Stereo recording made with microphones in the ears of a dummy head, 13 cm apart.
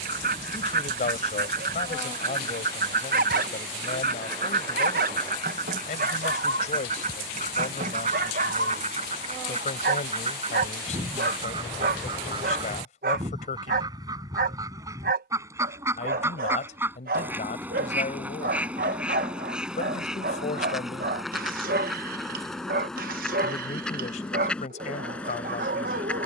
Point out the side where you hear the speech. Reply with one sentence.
You can hear the speech on the left.